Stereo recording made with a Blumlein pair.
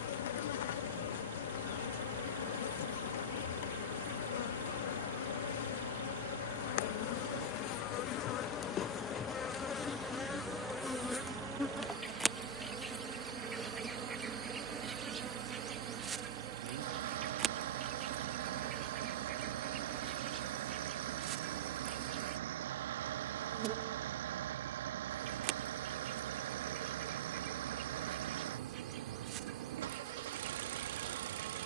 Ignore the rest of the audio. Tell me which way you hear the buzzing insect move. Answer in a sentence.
You can hear the buzzing insect move from left to right.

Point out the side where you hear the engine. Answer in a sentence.
In this clip you hear the engine on the right.